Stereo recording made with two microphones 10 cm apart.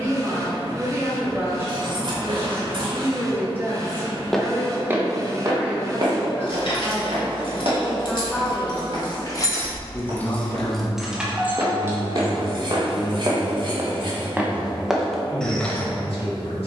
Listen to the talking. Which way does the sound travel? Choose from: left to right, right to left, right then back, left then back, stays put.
right to left.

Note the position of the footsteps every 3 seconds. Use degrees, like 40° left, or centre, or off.
off, 20° right, 70° right, 70° right, 30° right, 10° left.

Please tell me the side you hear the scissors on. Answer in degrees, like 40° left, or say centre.
60° right.